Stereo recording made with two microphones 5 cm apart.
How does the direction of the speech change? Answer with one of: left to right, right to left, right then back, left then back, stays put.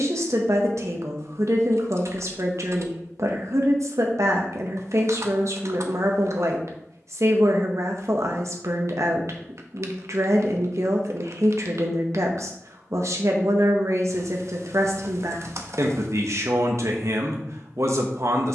stays put.